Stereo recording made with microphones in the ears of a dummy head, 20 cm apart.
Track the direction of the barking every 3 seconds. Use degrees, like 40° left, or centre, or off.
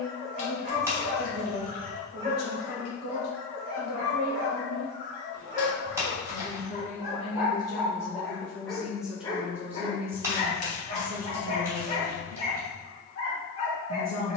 40° right, 40° right, 10° right, 30° left, 30° left.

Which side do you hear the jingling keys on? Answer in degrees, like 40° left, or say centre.
10° right.